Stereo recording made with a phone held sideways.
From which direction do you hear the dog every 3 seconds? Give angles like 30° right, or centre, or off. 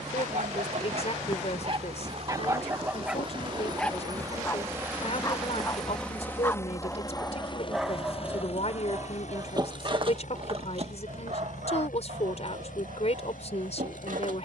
40° right, 10° left, centre, 40° right, 70° right.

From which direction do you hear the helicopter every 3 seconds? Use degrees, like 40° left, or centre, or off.
50° right, 20° right, 30° left, 60° left, 70° left.